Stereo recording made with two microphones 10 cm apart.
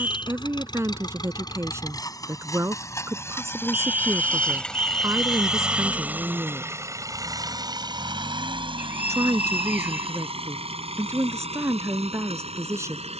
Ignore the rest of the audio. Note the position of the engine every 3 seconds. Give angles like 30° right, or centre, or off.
40° left, 10° left, 40° right, 70° right, 80° right.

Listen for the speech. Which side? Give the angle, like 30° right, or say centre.
30° right.